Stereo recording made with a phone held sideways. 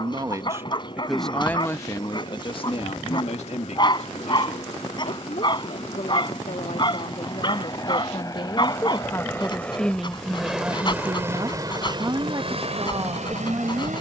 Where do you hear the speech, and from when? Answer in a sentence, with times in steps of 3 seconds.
You can hear the speech in the centre from 0 s, on the left from 3 s, in the centre from 9 s and on the right from 12 s.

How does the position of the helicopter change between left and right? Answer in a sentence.
You can hear the helicopter move to the right.